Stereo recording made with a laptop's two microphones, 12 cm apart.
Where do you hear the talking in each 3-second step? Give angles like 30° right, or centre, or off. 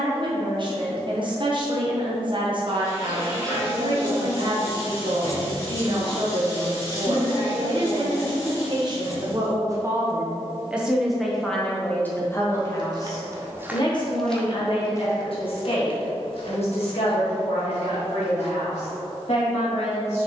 40° right, 40° right, 40° right, 10° right, 40° left, 60° left, 70° left.